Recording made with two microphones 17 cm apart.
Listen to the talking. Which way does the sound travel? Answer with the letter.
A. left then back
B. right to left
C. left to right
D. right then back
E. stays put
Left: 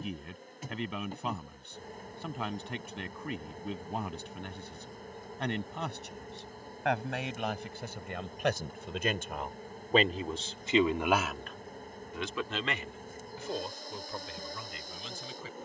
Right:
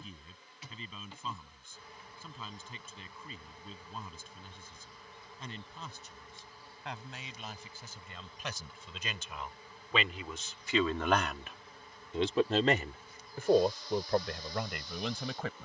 C.